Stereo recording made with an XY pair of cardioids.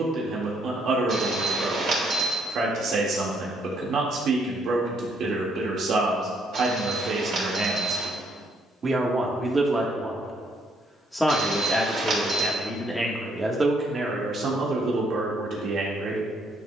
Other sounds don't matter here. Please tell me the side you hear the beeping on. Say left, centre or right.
right.